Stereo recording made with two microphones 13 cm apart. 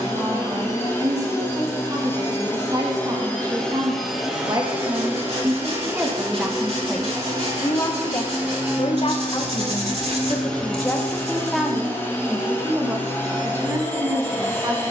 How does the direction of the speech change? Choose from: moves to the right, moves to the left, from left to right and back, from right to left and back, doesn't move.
from right to left and back.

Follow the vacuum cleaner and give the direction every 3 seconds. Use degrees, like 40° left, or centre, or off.
20° left, 10° right, 20° right, 10° left, 20° left.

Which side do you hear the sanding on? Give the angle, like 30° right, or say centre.
50° right.